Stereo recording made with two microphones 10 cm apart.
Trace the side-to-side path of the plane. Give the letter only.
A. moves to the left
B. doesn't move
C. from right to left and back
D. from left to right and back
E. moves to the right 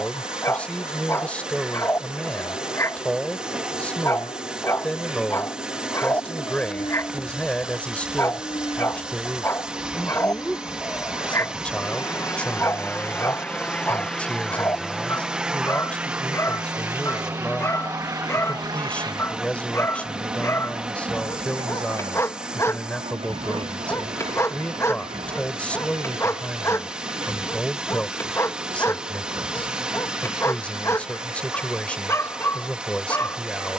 E.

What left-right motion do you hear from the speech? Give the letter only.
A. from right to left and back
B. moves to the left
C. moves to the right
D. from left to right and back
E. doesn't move
E.